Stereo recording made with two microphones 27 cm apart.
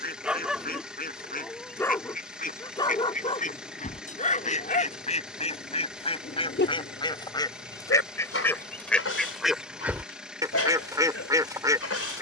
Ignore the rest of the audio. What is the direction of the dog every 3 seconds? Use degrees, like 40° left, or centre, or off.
10° left, 30° left, 50° left, 60° left.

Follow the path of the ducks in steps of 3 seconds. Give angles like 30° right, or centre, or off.
30° left, 30° left, 10° left, 10° right.